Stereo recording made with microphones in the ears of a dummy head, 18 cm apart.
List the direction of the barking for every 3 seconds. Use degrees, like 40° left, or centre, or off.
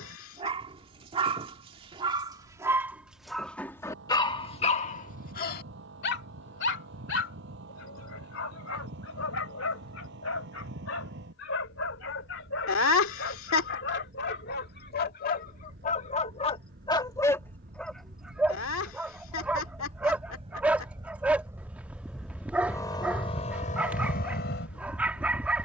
20° right, 30° left, 70° left, 80° left, 60° left, 30° left, 10° right, 10° right, 10° right.